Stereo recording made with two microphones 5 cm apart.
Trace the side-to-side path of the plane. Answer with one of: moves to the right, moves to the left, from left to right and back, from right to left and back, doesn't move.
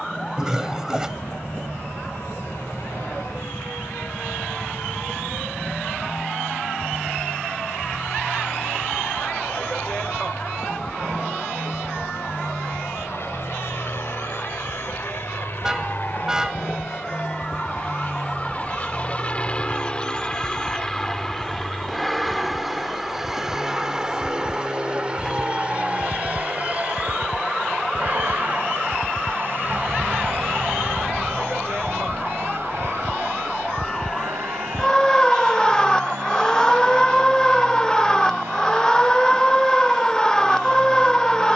moves to the right.